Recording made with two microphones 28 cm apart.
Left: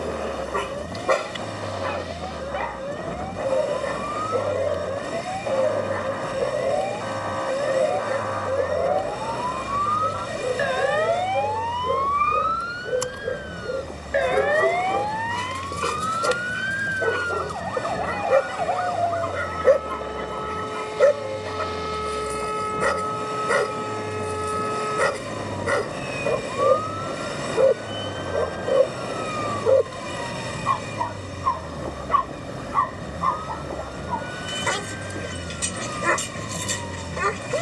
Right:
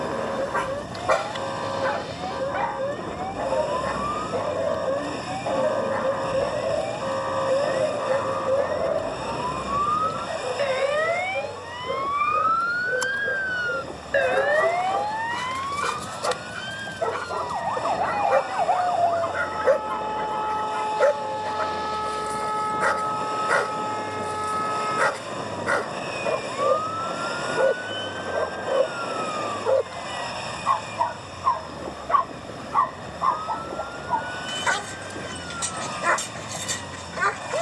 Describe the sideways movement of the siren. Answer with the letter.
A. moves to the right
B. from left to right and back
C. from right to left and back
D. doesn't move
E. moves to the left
E.